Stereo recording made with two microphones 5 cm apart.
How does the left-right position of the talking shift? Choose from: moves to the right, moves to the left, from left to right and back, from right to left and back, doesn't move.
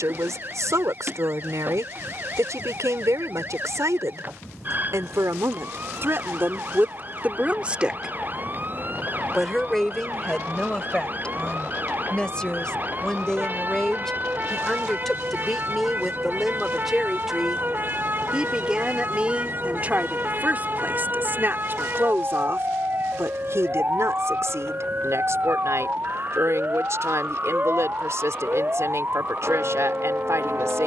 from right to left and back.